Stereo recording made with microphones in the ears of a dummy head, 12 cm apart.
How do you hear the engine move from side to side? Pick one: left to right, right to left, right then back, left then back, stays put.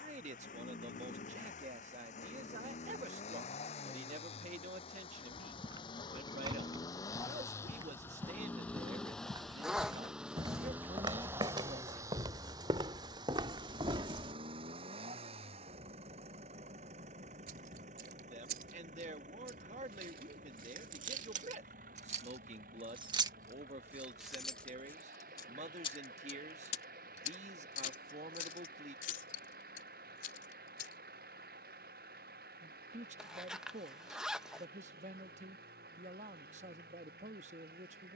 left to right.